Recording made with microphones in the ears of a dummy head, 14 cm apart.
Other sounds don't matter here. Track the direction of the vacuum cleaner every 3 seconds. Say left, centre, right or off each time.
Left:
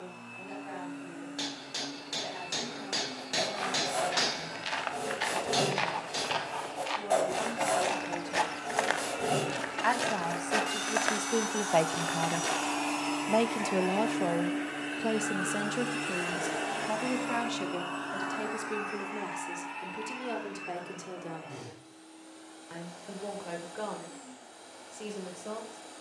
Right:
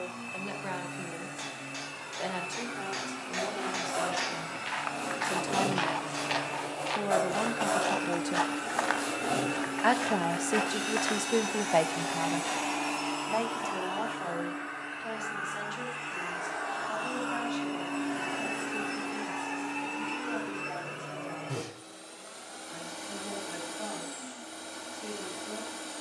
right, right, right, right, centre, left, right, right, right.